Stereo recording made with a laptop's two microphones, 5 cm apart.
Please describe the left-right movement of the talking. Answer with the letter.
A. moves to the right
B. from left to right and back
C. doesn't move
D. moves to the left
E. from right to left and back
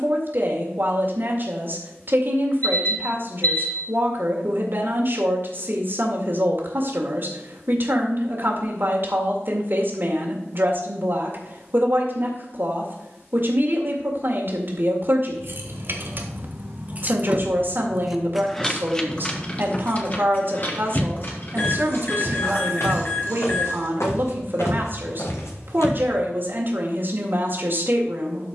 C.